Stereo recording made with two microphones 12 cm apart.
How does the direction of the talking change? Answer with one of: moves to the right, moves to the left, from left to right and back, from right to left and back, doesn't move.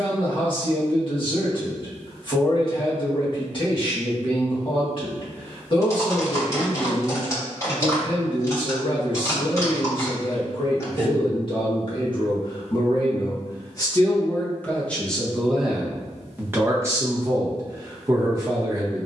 moves to the right.